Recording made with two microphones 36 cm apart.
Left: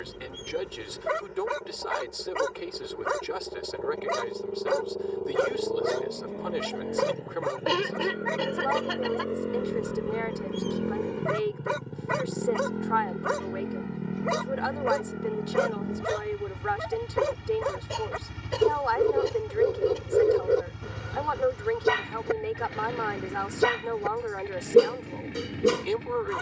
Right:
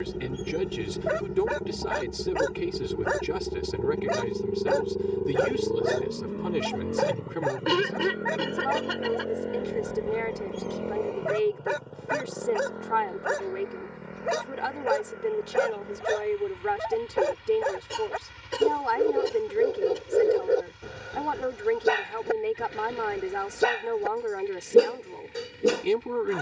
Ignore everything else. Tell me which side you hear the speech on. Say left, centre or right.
right.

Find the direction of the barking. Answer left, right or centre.
centre.